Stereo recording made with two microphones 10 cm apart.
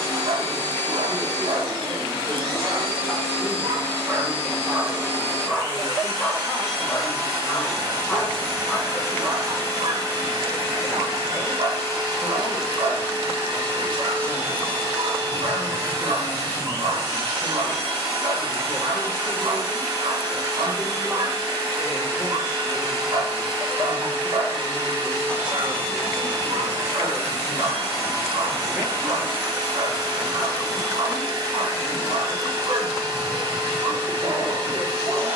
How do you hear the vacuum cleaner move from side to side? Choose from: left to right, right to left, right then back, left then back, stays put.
stays put.